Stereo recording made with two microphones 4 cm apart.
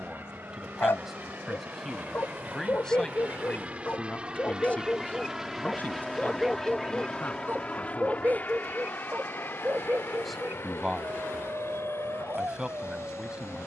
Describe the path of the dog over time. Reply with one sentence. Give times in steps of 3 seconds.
In this clip you hear the dog on the left from 0 s and on the right from 6 s.